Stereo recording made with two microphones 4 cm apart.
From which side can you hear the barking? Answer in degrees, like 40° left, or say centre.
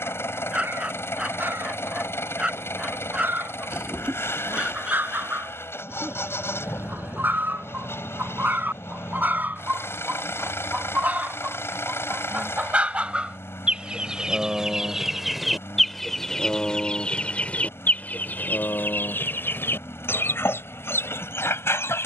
30° right.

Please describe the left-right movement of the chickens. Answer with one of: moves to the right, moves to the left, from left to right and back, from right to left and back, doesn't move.
moves to the left.